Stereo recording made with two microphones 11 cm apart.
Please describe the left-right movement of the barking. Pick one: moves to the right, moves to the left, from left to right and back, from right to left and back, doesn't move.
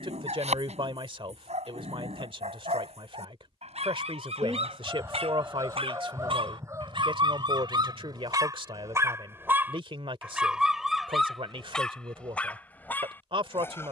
moves to the left.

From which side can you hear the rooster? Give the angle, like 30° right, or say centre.
30° right.